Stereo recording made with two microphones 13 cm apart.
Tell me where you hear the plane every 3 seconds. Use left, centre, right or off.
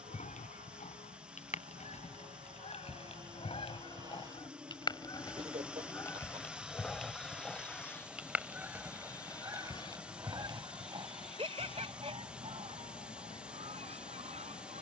right, right, centre, left, left.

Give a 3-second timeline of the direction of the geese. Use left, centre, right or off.
left, left, centre, right, right.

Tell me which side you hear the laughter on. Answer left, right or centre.
right.